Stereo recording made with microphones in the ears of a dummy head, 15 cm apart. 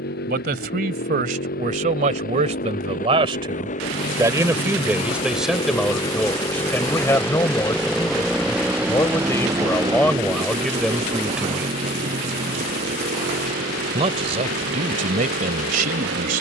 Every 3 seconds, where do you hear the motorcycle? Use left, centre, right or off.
left, left, centre, right, right, right.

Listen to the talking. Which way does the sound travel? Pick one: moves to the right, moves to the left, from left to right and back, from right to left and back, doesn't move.
from right to left and back.